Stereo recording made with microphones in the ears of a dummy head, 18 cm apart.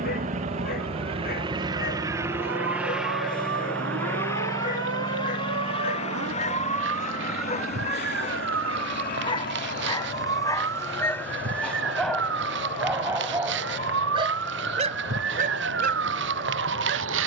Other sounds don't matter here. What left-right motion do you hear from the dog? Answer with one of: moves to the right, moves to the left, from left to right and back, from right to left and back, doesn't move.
moves to the right.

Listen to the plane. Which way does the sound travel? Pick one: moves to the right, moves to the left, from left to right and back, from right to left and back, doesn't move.
moves to the left.